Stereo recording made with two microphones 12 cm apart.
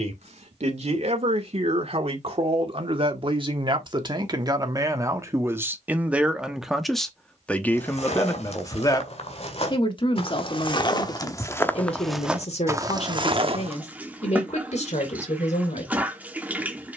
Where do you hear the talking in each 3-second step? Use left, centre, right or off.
right, right, centre, left, left, left.